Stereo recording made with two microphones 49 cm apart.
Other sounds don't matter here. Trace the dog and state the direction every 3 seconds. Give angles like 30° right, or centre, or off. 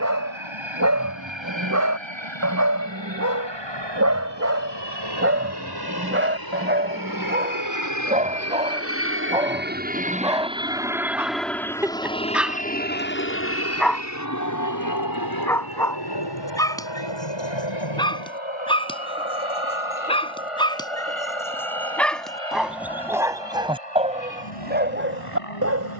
30° right, 30° right, 20° right, 10° right, centre, 10° left, 10° left, centre, 20° right.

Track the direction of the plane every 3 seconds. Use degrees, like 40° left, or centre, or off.
60° right, 50° right, 40° right, 10° right, 20° left, 50° left, 60° left, 70° left, 70° left.